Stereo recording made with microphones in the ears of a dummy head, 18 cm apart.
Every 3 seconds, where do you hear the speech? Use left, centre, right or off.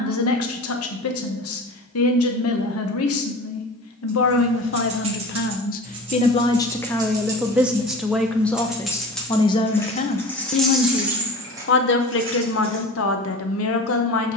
left, left, centre, left, left.